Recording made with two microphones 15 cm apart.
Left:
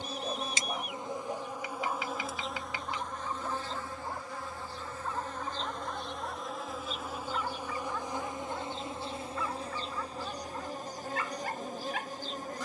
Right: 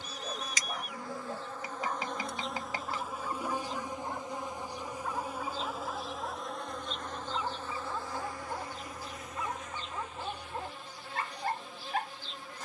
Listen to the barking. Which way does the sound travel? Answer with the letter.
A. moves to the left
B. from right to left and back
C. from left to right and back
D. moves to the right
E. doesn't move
D.